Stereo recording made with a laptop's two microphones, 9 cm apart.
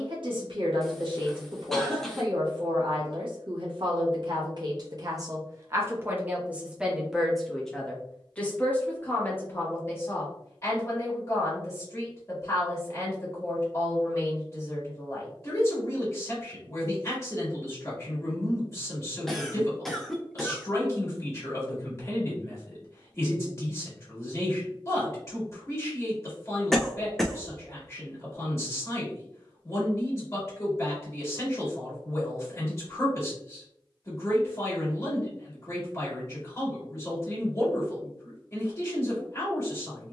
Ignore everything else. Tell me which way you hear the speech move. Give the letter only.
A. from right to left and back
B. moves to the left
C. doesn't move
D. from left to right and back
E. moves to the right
B.